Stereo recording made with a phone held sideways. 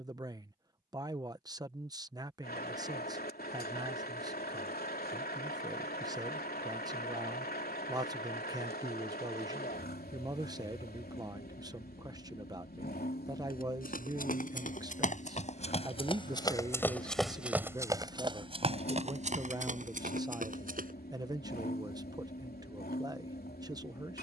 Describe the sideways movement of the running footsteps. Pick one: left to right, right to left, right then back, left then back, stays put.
left to right.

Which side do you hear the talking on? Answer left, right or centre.
right.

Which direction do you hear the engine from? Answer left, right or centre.
left.